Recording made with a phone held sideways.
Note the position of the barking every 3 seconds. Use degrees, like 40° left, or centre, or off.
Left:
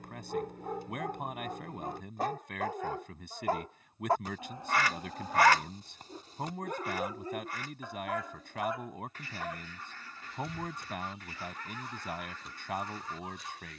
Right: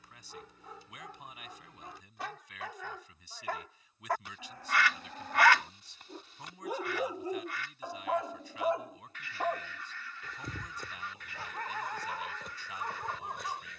50° left, 20° left, 20° right, 50° right, 60° right.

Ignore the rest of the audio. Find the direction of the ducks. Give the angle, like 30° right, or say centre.
40° left.